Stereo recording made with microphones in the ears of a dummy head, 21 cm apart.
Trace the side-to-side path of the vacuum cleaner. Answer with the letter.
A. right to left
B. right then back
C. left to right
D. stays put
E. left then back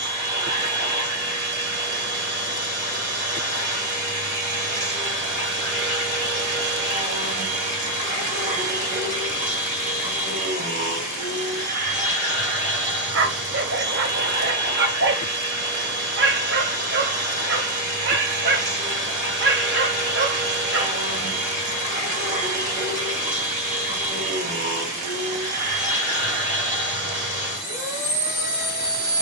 D.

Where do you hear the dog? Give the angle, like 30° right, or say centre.
50° right.